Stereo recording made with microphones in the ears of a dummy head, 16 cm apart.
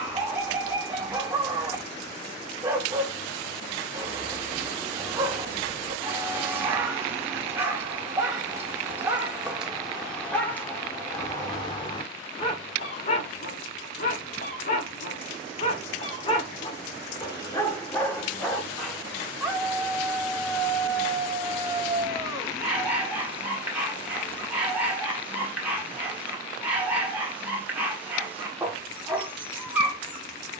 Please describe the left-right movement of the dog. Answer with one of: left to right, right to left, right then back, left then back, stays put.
left then back.